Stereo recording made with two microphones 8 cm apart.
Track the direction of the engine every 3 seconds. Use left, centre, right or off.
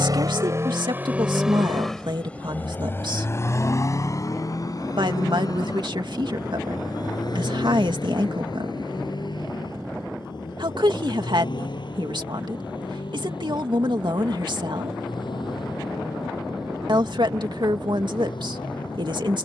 centre, left, left, left, left, left, left.